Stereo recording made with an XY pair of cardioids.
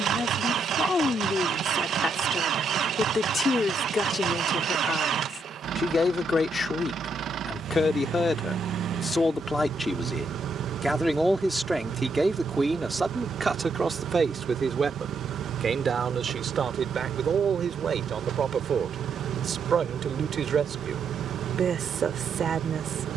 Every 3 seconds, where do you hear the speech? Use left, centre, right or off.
left, left, left, centre, right, right, right, right.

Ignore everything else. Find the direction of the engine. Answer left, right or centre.
right.